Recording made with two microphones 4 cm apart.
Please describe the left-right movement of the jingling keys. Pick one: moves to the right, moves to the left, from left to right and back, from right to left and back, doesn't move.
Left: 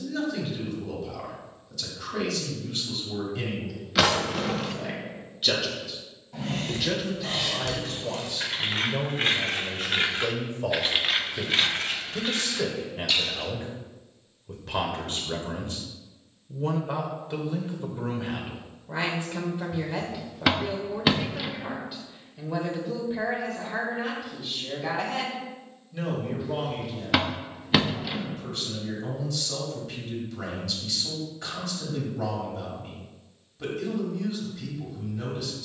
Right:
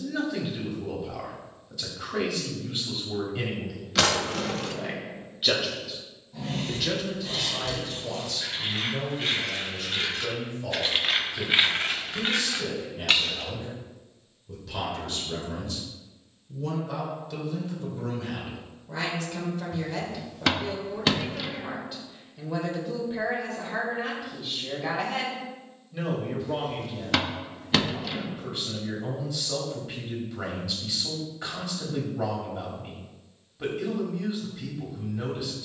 moves to the right.